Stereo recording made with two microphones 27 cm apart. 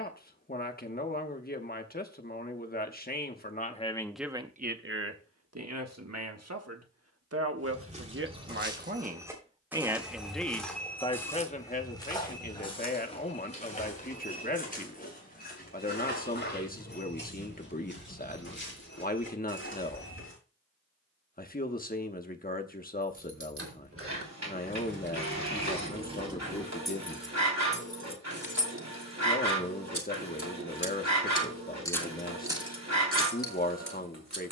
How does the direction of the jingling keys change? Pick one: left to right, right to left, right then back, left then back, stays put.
left then back.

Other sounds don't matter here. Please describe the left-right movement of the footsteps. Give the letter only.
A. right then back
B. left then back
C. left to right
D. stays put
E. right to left
E.